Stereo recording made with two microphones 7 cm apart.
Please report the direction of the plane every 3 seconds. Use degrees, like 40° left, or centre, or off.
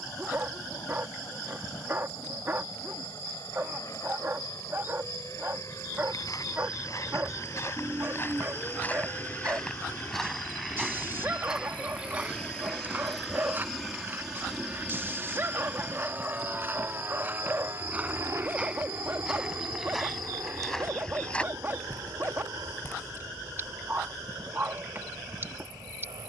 60° left, 50° left, 40° left, 30° left, centre, 20° right, 50° right, 60° right, 70° right.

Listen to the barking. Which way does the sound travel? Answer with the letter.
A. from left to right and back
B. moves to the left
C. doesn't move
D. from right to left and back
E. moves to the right
C.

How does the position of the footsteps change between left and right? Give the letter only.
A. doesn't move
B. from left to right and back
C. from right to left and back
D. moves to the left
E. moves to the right
B.